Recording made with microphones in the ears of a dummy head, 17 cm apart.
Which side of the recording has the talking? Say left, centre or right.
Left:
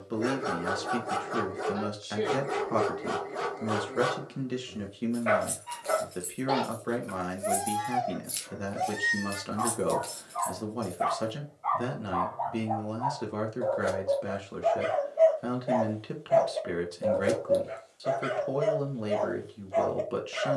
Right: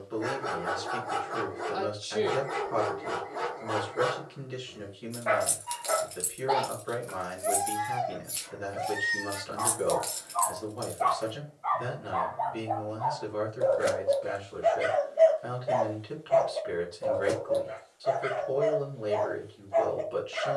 left.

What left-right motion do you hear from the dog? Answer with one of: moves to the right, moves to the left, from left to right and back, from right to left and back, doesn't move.
from left to right and back.